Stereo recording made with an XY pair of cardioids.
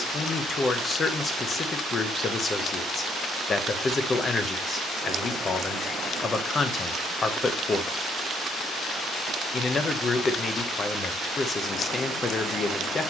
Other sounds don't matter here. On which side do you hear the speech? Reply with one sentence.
You can hear the speech on the left.